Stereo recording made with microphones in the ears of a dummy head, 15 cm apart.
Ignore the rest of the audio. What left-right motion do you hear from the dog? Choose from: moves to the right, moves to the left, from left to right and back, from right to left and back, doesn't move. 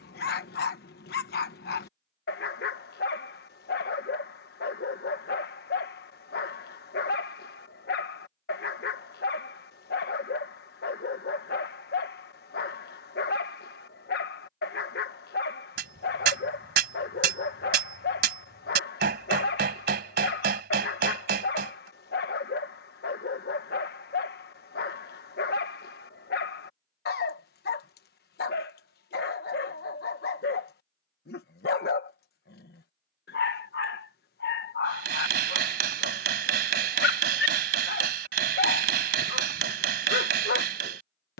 doesn't move.